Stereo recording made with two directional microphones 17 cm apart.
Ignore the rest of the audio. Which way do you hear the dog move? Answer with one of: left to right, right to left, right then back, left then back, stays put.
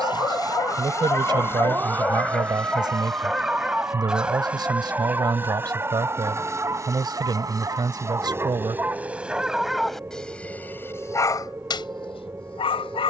right then back.